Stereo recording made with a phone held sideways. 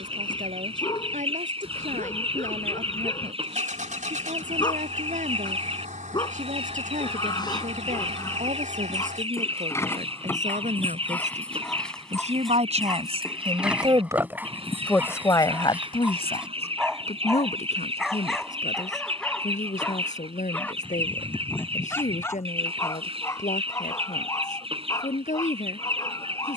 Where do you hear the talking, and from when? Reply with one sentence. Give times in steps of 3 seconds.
In this clip you hear the talking on the right from 0 s and on the left from 15 s.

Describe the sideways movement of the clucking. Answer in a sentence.
In this clip you hear the clucking stay in one place.